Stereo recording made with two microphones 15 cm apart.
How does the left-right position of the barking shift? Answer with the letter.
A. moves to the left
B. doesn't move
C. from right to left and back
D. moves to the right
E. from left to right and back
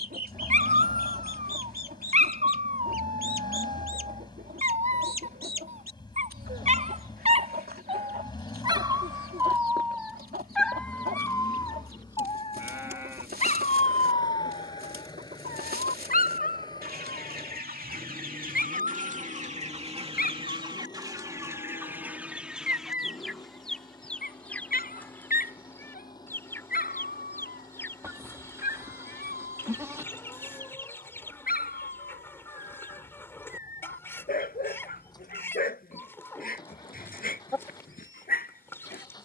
A.